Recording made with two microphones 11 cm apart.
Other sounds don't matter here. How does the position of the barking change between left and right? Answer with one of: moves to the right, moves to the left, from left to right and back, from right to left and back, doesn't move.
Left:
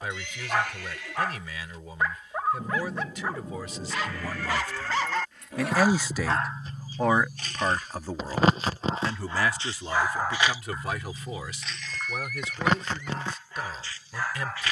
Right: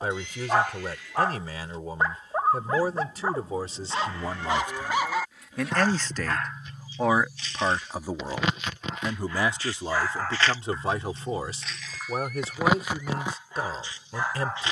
from right to left and back.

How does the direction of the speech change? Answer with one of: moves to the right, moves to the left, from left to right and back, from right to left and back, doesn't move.
from right to left and back.